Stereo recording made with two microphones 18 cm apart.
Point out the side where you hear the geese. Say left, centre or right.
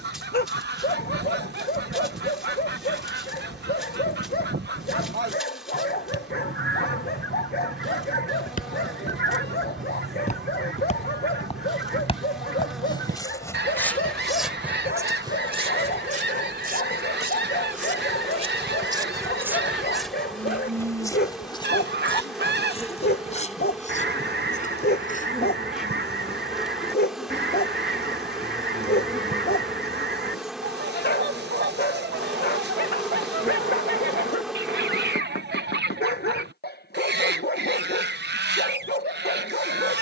right.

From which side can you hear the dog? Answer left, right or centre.
left.